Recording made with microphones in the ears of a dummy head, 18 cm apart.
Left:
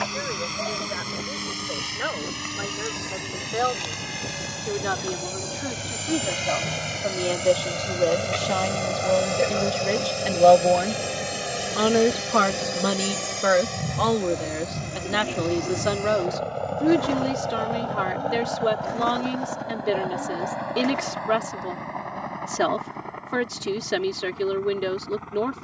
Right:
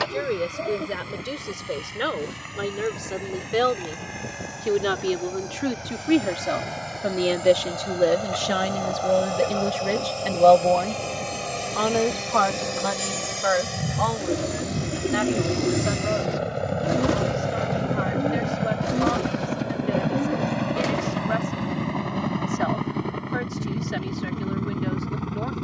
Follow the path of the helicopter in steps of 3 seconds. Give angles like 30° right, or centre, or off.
60° left, 50° left, 40° left, 20° left, centre, 20° right, 40° right, 40° right, 50° right.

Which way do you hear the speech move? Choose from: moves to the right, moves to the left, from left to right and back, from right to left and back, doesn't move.
moves to the left.